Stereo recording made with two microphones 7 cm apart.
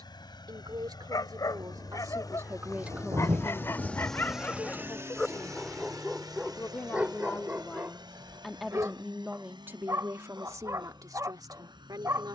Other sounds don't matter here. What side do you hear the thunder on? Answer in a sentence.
You can hear the thunder on the right.